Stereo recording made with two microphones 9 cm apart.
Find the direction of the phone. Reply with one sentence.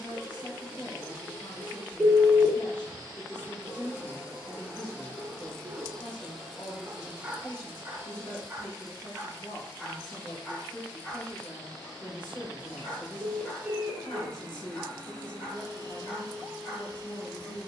In this clip you hear the phone in the centre.